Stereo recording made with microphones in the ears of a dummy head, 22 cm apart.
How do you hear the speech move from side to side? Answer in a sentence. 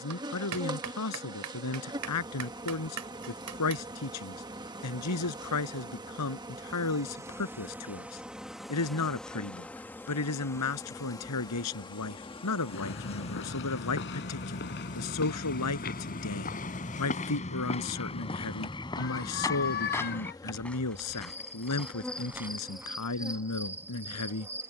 In this clip you hear the speech stay in one place.